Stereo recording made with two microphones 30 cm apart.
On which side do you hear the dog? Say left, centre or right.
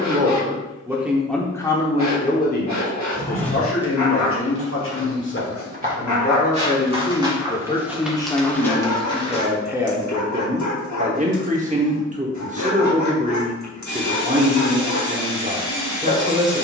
left.